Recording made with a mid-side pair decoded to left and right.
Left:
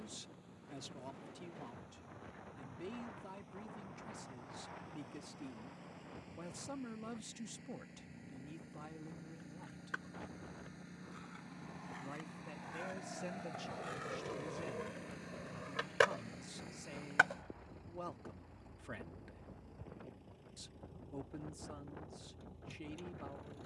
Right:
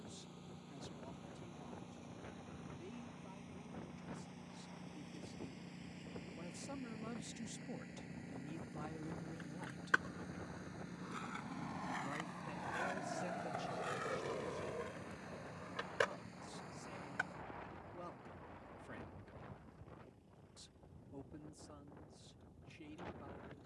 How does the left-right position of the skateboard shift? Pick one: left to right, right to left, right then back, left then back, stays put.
right to left.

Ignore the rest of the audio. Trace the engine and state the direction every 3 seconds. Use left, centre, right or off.
right, right, right, centre, centre, left, left, left.